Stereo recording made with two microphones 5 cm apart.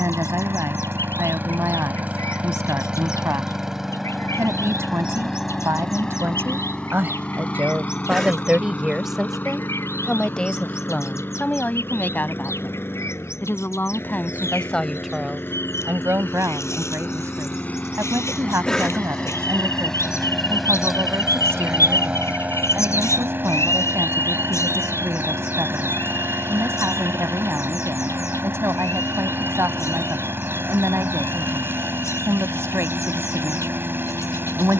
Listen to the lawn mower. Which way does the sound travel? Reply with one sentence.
In this clip you hear the lawn mower go left and come back.